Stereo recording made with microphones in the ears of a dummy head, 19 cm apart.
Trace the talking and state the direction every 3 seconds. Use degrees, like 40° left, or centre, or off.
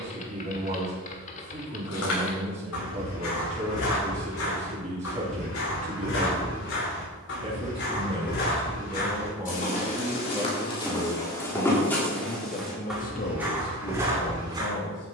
30° right, 30° right, 30° right, centre, 50° left.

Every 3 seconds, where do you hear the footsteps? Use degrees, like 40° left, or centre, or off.
80° left, 70° left, 50° left, 20° left, 10° right.